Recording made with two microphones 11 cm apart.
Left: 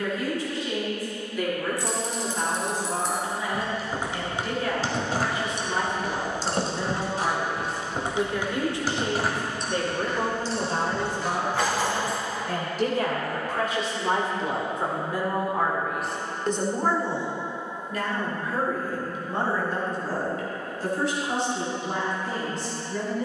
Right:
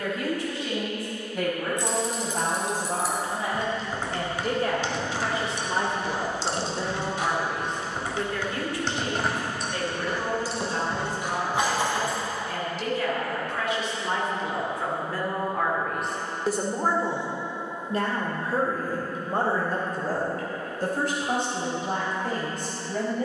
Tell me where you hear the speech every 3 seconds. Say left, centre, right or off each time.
right, right, centre, left, left, centre, right, right.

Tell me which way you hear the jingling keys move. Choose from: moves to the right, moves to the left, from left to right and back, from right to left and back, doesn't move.
from right to left and back.